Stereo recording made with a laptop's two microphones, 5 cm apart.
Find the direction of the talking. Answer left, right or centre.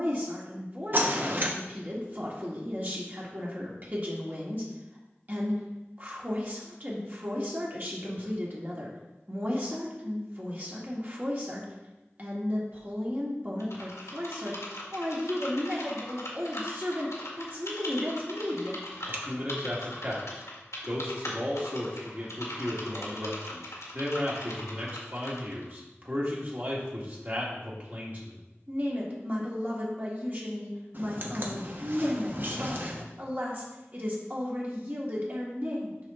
right.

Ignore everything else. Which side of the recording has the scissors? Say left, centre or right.
right.